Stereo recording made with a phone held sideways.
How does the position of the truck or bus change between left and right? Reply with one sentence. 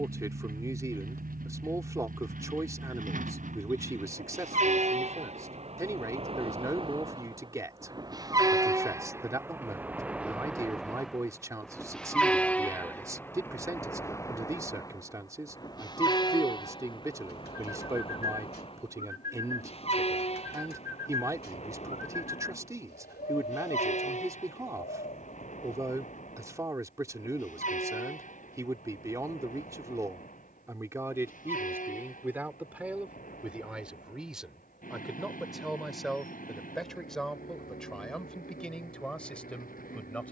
In this clip you hear the truck or bus travel towards the left.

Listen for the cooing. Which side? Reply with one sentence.
In this clip you hear the cooing on the left.